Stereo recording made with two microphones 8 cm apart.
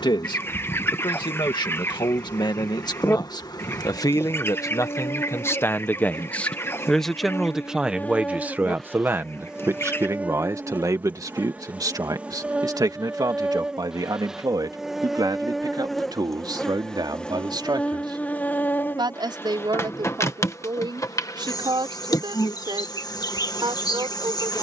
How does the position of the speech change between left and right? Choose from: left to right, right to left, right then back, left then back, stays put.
left to right.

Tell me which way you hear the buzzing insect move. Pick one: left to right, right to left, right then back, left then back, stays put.
right then back.